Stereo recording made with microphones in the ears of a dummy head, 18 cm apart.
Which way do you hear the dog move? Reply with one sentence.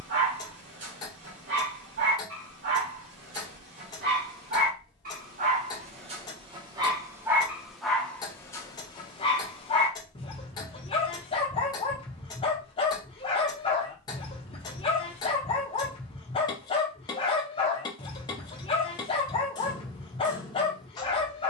You can hear the dog travel towards the left.